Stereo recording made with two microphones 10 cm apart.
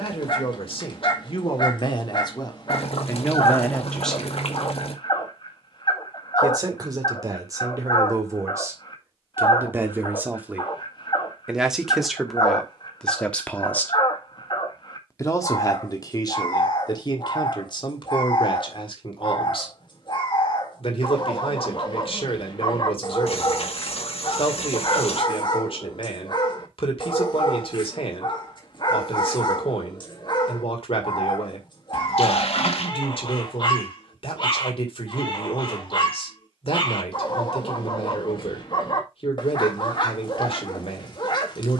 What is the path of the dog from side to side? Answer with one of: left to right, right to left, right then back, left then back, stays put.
stays put.